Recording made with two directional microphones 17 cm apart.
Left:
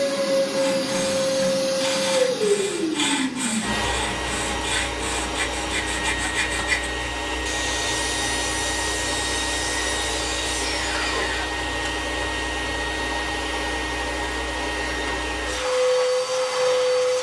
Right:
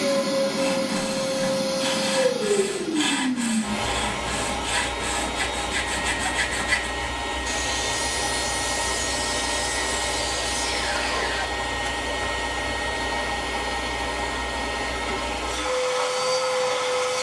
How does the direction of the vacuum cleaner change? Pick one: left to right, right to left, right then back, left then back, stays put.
stays put.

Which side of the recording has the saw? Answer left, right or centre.
left.